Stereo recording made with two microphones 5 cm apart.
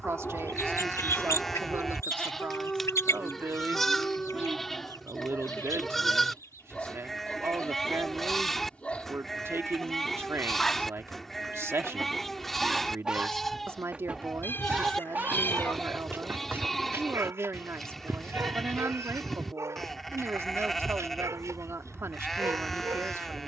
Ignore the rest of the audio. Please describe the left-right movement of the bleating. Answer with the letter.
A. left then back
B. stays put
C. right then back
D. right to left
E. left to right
B.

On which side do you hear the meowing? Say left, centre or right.
left.